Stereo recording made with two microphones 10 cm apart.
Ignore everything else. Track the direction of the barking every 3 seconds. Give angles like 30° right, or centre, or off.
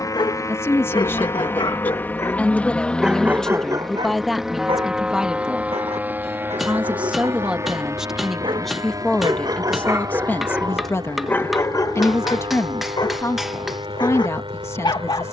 40° left, 40° right, 60° right, 10° right, 40° left.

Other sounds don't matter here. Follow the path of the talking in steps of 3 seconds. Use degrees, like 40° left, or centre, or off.
20° left, centre, 10° right, 20° left, 30° left.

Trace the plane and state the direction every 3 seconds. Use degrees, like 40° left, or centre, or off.
20° left, centre, 20° right, 40° right, 50° right.